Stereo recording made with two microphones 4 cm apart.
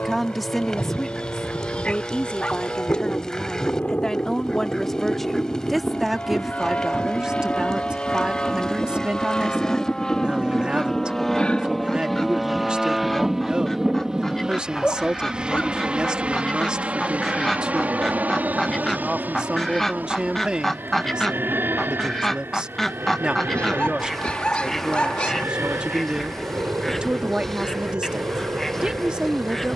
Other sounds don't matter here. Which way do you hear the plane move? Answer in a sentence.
In this clip you hear the plane go from the left side to the right.